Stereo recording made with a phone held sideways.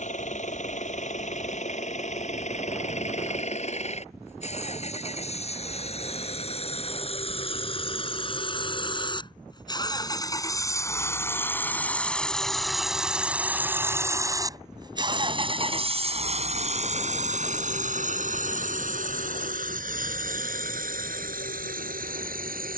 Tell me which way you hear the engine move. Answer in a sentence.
In this clip you hear the engine go from the left side to the right.